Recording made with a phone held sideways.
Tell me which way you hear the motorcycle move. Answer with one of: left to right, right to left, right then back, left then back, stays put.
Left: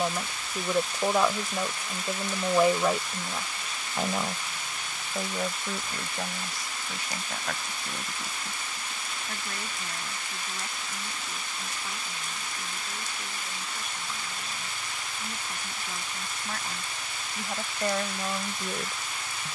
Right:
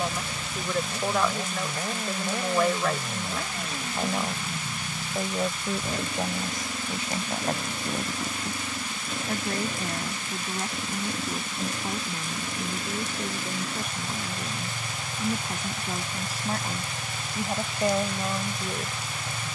stays put.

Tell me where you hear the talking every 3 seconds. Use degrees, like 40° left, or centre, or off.
10° left, 10° right, 30° right, 40° right, 50° right, 40° right, 10° right.